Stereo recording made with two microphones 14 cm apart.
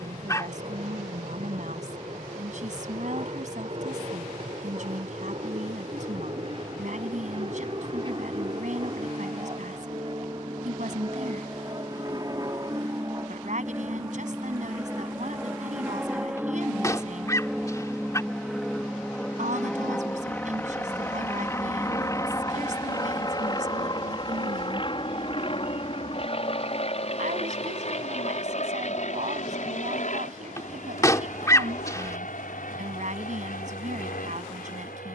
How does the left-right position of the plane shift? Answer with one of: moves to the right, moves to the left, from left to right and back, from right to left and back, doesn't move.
moves to the left.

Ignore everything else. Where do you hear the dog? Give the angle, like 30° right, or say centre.
20° left.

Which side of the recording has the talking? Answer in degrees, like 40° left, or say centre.
60° right.